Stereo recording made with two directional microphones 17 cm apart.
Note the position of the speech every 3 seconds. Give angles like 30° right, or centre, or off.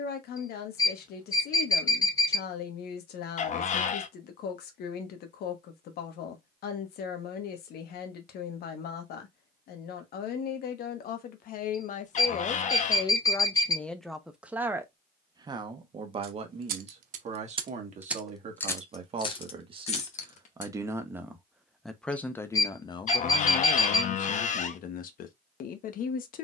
70° left, 70° left, 70° left, 60° left, 20° left, 40° right, 30° right, 20° left, 60° left.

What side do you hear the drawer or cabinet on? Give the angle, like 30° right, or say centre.
50° left.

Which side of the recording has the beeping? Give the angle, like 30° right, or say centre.
20° left.